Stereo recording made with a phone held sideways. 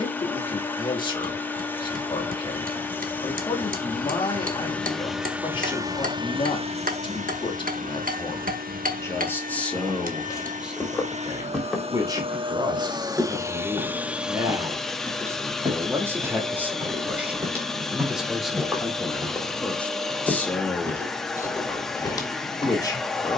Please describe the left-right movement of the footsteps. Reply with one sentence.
In this clip you hear the footsteps go right and come back.